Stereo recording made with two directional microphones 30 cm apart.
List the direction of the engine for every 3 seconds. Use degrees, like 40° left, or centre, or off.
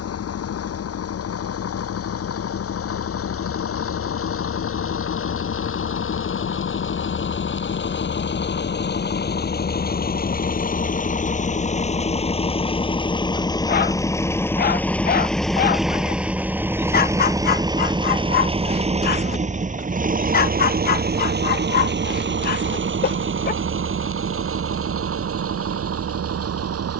60° left, 50° left, 40° left, 30° left, 10° left, 10° right, 30° right, 40° right, 50° right.